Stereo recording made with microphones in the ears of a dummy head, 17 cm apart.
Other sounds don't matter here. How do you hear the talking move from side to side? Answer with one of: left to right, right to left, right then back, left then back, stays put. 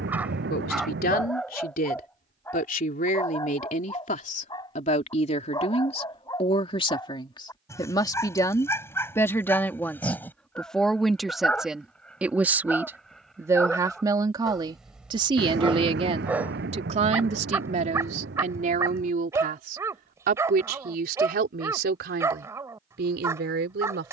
left to right.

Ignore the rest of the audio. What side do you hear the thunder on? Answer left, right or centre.
right.